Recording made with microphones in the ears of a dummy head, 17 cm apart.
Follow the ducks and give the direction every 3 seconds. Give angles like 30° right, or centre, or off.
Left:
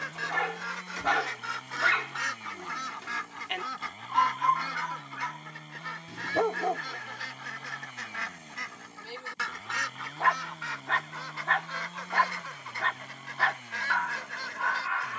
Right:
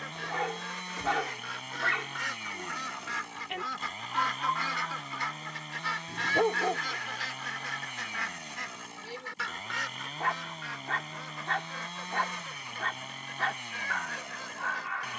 30° left, 10° right, centre, 30° left, 40° left.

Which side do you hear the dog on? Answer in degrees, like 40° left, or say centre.
40° left.